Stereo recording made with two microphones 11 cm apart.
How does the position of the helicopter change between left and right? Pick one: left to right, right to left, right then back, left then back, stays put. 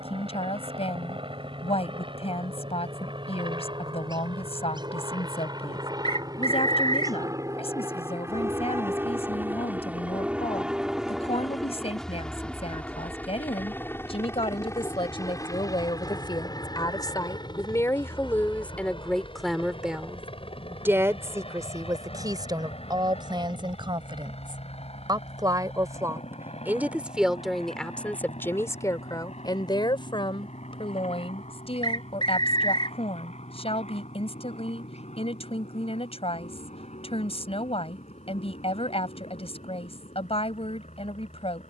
right to left.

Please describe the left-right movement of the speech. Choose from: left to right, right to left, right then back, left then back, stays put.
right then back.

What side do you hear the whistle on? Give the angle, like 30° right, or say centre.
50° left.